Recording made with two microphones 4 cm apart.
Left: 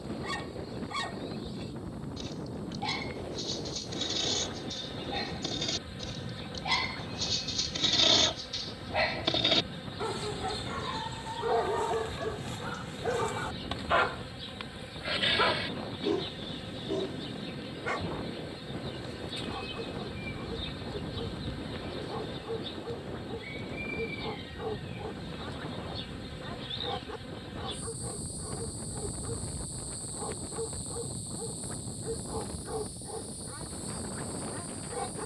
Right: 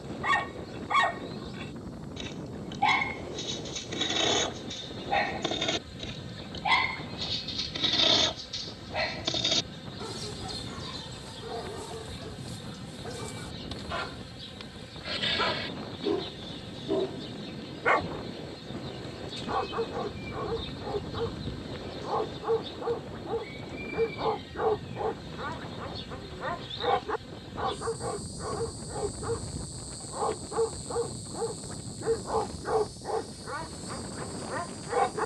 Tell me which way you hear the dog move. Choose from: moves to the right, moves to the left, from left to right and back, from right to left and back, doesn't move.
from right to left and back.